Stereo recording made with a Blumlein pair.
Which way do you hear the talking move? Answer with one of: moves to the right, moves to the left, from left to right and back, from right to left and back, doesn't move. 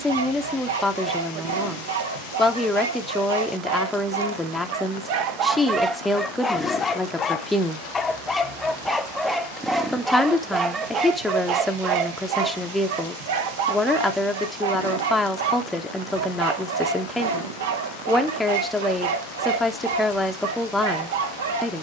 doesn't move.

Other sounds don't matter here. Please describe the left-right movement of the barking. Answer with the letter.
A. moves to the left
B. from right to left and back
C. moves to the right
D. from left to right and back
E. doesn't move
B.